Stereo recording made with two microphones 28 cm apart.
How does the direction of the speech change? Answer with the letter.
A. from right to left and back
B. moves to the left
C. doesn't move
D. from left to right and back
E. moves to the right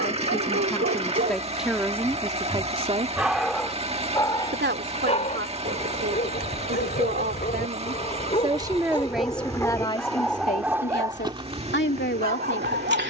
D.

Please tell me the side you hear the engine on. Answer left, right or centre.
right.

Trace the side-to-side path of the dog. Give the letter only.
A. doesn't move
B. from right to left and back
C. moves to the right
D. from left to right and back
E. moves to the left
B.